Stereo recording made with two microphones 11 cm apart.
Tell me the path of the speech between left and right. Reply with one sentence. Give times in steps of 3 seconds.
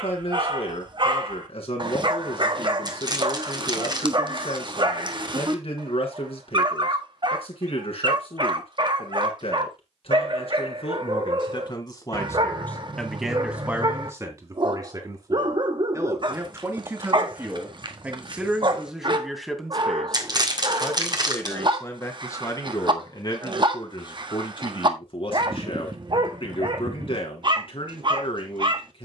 In this clip you hear the speech on the left from 0 s, in the centre from 12 s, on the right from 15 s, in the centre from 18 s and on the left from 21 s.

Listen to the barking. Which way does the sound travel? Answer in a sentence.
You can hear the barking stay in one place.